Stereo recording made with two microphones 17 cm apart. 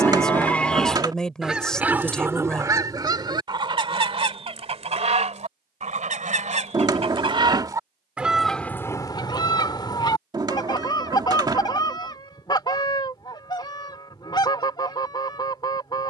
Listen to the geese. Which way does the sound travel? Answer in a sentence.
You can hear the geese go right and come back.